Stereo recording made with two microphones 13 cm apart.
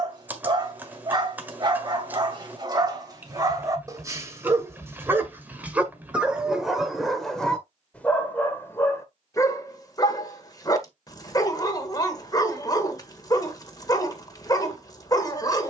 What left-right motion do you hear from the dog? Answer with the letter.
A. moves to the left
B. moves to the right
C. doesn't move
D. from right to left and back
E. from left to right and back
A.